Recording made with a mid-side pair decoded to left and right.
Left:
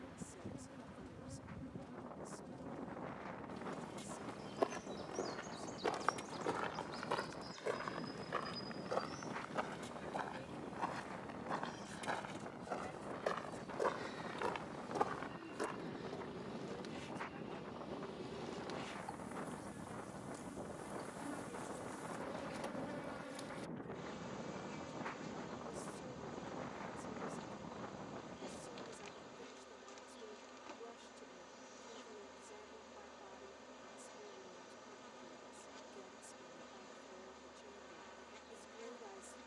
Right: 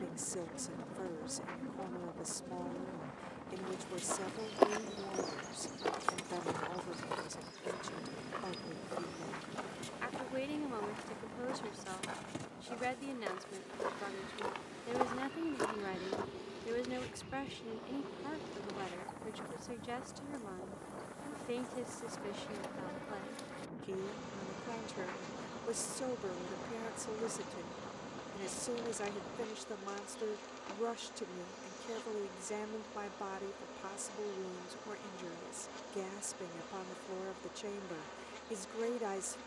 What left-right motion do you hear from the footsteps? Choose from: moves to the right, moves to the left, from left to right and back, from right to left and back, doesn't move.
from right to left and back.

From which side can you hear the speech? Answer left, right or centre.
right.